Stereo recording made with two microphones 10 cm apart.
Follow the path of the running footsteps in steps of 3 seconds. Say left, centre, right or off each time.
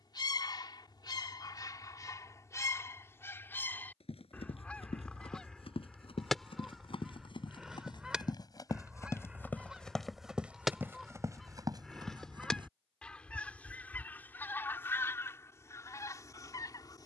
off, left, left, centre, right, off.